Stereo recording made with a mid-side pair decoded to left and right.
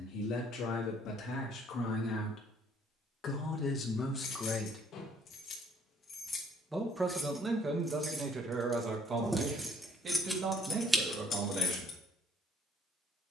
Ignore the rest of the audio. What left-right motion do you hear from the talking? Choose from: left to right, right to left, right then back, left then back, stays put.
left to right.